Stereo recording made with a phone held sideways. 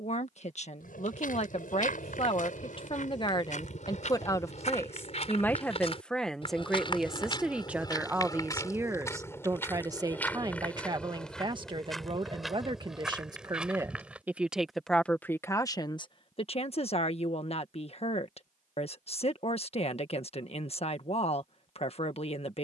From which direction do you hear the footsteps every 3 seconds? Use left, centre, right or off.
left, left, left, centre, centre, off, off, off.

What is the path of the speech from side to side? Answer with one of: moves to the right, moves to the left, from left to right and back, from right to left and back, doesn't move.
from left to right and back.